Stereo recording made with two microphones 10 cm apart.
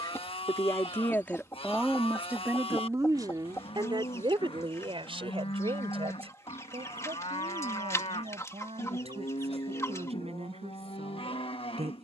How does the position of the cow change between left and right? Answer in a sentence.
In this clip you hear the cow stay in one place.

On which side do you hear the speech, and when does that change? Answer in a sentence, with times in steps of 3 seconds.
You can hear the speech in the centre from 0 s and on the right from 3 s.